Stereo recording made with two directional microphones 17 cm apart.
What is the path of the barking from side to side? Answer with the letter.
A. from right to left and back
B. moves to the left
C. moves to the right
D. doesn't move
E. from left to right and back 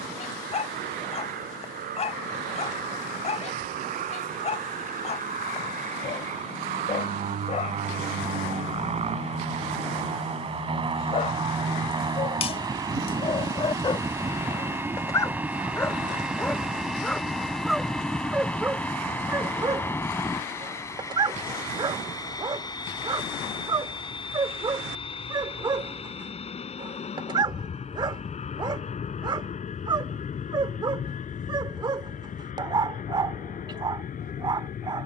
C.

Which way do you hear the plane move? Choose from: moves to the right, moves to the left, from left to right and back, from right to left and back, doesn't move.
moves to the left.